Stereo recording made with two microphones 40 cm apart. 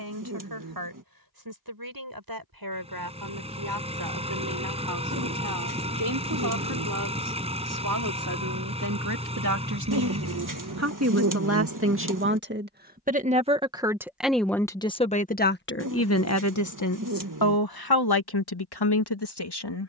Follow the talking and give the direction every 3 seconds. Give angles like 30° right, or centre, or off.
60° right, 60° right, 50° right, 40° right, 10° right, 40° left, 70° left.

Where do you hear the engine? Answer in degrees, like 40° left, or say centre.
10° right.